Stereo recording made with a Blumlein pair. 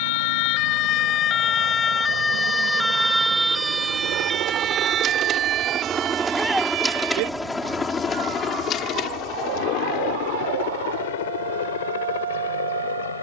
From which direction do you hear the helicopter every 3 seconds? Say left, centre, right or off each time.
right, right, centre, left, left.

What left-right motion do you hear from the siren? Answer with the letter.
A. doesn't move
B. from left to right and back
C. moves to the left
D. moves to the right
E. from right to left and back
D.